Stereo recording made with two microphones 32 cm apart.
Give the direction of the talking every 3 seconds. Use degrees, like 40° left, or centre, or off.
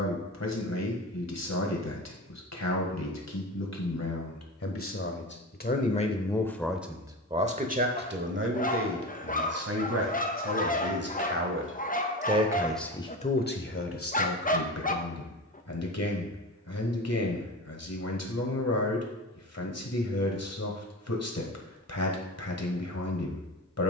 60° left, 50° left, 20° right, 50° right, 30° left, 60° left, 60° left, 60° left.